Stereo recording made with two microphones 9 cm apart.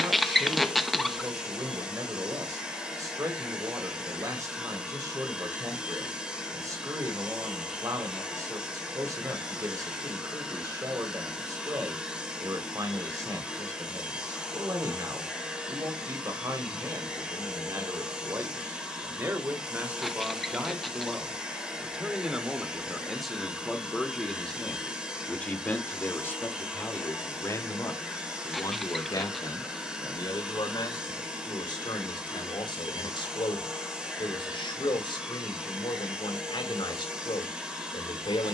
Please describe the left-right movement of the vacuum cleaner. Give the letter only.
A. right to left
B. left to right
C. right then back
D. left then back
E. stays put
E.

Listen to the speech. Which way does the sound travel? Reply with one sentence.
You can hear the speech move to the left.